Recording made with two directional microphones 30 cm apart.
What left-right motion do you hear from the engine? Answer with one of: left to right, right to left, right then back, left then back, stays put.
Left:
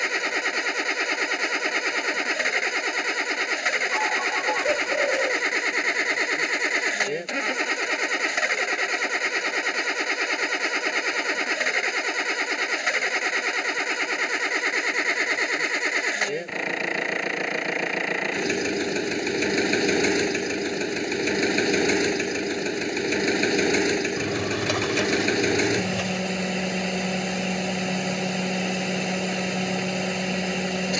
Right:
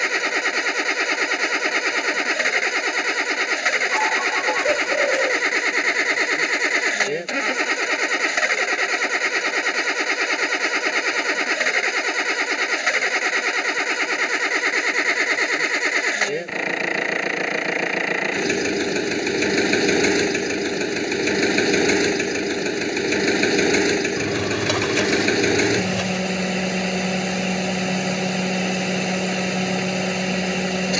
stays put.